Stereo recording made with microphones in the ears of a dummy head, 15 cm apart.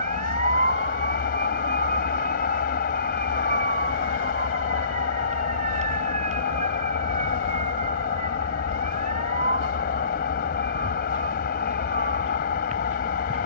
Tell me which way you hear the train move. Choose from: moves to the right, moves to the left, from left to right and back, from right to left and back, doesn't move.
doesn't move.